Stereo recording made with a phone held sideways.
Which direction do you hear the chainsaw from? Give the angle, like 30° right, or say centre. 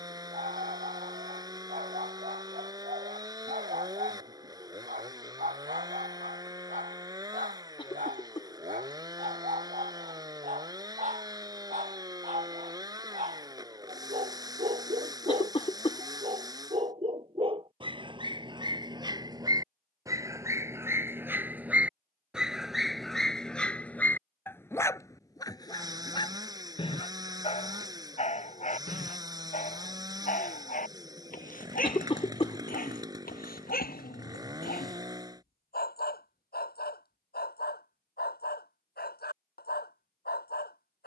20° right.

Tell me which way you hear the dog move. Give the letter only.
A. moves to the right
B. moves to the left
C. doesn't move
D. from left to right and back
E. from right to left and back
B.